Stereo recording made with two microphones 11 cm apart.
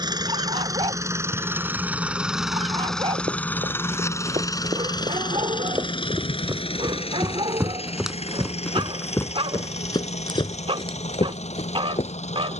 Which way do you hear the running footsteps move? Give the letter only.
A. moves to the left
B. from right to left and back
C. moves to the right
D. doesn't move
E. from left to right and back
A.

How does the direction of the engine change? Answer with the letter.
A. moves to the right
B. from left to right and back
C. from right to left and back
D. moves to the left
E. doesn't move
D.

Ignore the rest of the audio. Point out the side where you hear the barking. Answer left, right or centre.
right.